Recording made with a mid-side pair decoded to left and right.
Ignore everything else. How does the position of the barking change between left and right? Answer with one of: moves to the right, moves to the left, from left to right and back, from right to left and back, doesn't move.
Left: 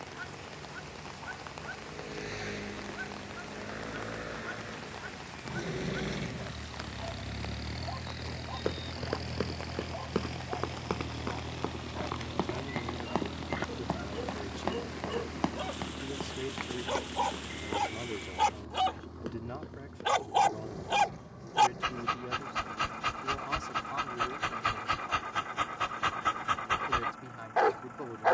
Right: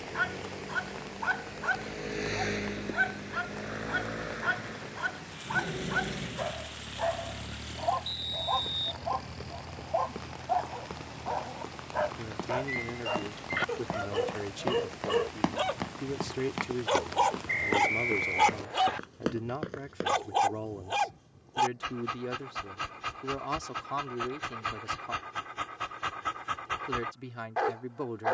moves to the left.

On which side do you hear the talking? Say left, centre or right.
right.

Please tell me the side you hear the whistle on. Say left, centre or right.
right.